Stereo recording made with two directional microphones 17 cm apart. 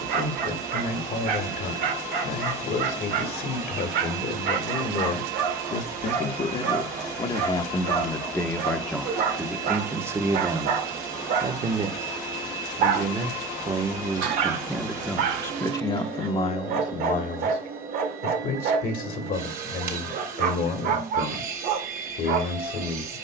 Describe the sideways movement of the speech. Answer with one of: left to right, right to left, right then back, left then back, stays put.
right then back.